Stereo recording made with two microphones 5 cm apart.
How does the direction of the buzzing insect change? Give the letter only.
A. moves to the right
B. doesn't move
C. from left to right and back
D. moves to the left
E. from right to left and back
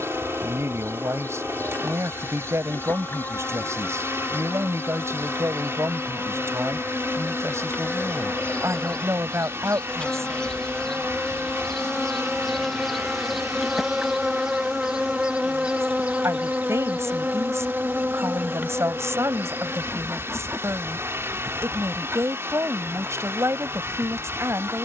A.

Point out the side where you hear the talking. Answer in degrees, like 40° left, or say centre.
70° right.